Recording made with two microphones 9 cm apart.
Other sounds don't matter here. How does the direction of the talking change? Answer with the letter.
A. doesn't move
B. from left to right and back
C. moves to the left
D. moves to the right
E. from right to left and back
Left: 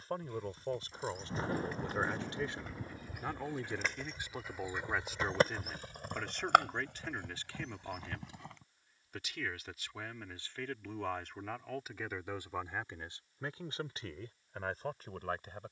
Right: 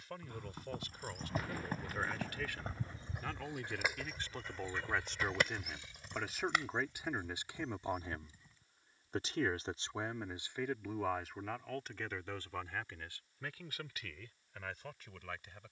B.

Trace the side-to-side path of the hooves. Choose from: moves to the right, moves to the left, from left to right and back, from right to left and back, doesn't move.
moves to the left.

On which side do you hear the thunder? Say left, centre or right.
left.